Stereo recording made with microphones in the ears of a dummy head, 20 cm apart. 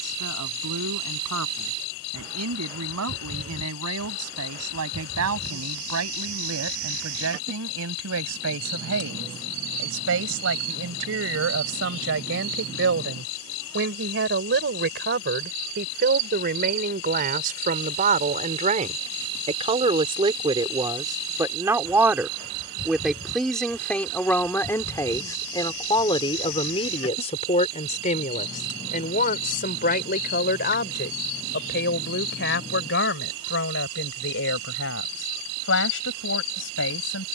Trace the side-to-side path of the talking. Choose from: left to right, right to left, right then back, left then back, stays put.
right to left.